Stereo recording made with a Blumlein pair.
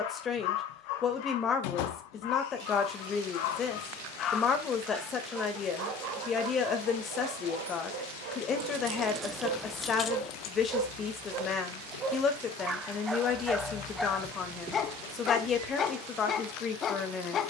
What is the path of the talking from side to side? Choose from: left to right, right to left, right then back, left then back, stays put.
stays put.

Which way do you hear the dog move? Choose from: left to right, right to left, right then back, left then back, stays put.
right then back.